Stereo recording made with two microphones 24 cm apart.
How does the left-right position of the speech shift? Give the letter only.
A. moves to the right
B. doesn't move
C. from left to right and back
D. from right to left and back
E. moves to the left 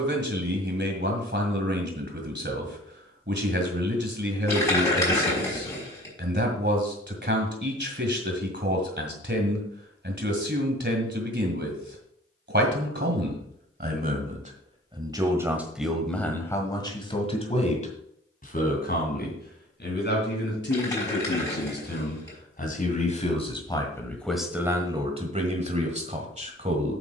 D.